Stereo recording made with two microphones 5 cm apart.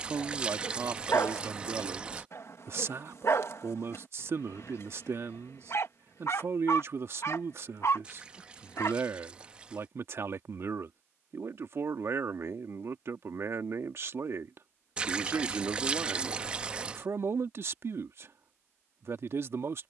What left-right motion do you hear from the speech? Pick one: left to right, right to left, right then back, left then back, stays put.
stays put.